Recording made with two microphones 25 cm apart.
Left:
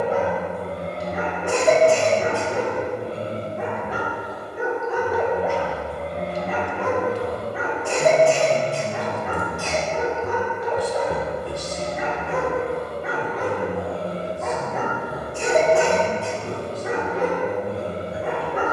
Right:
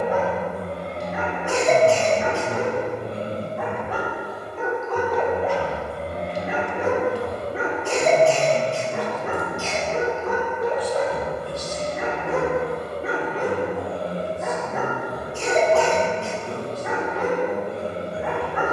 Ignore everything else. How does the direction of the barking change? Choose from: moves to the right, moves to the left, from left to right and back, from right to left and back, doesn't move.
from left to right and back.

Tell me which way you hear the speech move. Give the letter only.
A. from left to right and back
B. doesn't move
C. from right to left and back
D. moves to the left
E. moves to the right
D.